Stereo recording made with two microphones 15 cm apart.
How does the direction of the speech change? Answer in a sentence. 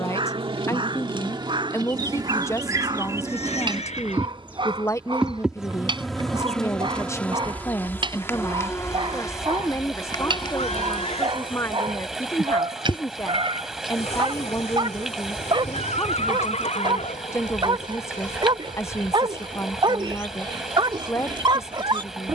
You can hear the speech stay in one place.